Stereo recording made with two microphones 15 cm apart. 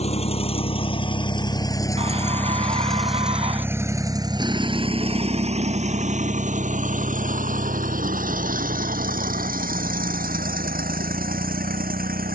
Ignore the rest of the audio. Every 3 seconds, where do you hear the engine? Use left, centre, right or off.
left, right, right, right.